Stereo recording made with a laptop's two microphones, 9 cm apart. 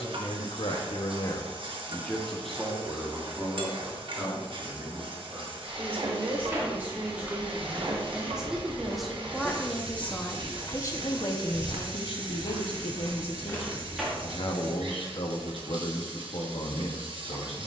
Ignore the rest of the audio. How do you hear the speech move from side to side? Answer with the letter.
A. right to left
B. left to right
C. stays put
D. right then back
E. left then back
D.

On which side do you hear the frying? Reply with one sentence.
In this clip you hear the frying on the right.